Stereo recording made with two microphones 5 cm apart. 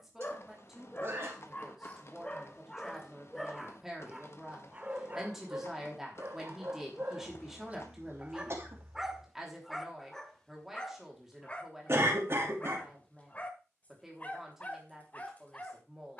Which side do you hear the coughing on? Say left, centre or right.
right.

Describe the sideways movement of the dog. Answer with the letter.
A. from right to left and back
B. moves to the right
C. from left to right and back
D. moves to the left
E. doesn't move
C.